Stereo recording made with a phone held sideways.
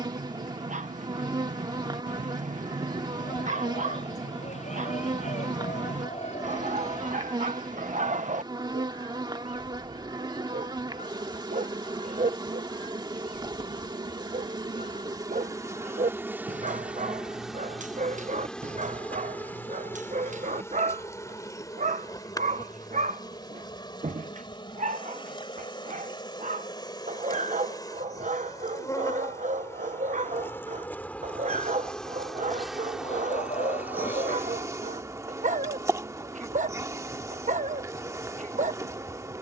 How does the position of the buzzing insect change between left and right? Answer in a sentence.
In this clip you hear the buzzing insect move from right to left and back again.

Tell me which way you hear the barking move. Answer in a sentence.
In this clip you hear the barking stay put.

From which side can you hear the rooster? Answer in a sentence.
You can hear the rooster on the left.